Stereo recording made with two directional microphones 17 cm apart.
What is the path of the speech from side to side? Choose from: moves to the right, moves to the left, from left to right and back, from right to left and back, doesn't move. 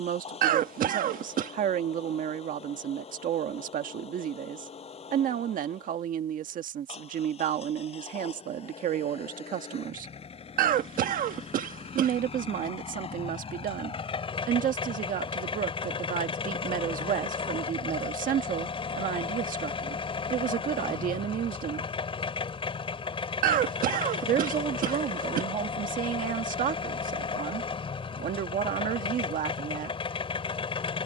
doesn't move.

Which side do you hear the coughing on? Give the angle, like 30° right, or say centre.
60° right.